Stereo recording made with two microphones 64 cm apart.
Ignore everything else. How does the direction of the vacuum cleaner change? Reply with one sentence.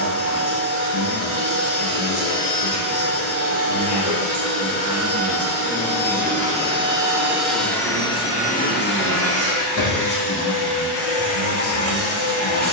You can hear the vacuum cleaner travel towards the left.